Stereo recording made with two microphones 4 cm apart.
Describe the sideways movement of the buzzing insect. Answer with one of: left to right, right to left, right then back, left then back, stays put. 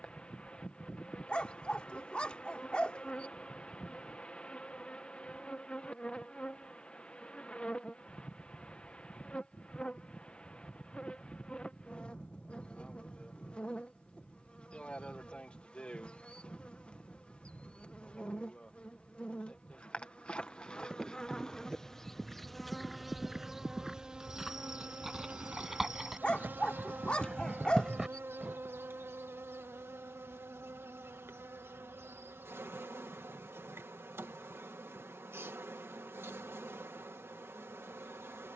left to right.